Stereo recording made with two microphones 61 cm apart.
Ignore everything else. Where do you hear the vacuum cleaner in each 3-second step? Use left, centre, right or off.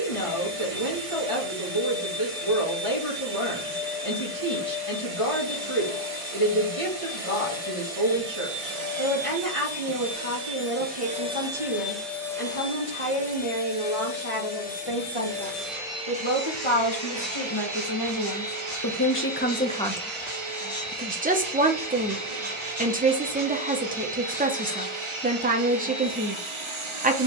right, right, right, right, centre, right, right, right, right.